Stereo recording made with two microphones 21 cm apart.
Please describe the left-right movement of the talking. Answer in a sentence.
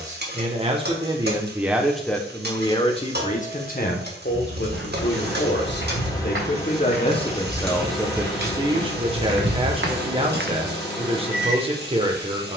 You can hear the talking go left and come back.